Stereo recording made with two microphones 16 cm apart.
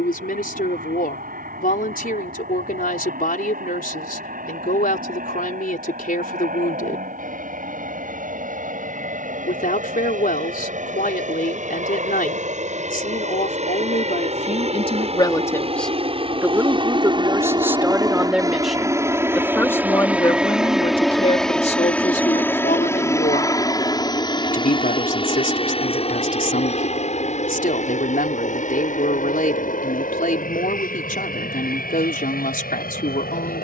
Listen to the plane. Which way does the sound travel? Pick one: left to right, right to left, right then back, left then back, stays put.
right to left.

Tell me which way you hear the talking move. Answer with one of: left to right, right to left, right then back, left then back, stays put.
right then back.